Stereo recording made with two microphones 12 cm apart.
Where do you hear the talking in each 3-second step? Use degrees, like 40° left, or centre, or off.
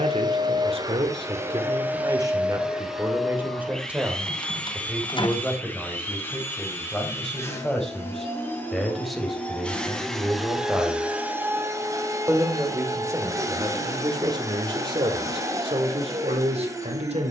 40° right, 10° right, 10° left, centre, 30° right, 50° right.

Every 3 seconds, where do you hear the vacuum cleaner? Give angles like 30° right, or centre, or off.
20° right, 10° left, 20° left, centre, 30° right, 30° right.